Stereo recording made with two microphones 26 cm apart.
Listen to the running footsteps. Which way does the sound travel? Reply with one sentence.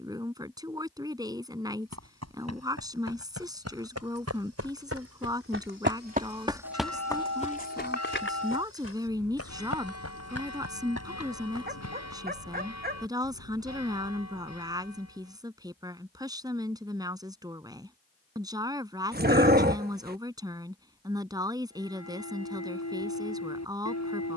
In this clip you hear the running footsteps travel towards the left.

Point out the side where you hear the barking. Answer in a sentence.
In this clip you hear the barking on the right.